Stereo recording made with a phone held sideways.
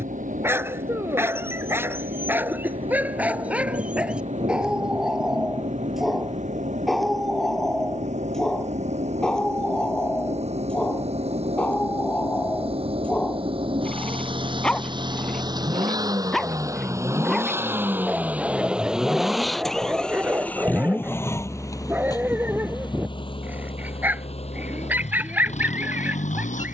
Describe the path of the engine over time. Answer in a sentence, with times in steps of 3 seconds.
You can hear the engine on the right from 0 s, in the centre from 18 s and on the left from 21 s.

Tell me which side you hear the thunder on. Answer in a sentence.
In this clip you hear the thunder on the right.